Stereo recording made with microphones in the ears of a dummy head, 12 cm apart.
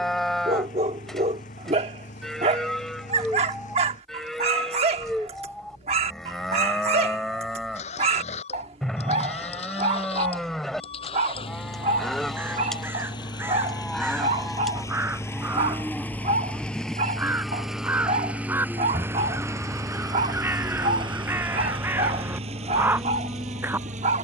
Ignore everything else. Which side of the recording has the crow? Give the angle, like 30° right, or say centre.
20° right.